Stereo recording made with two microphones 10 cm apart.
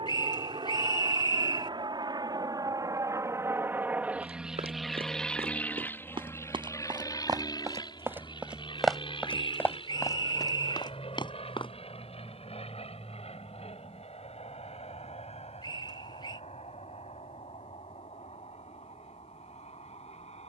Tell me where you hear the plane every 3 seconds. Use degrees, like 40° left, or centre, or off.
50° right, 10° right, 40° left, 50° left, 60° left, 70° left, 70° left.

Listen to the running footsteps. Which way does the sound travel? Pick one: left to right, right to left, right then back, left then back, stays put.
right to left.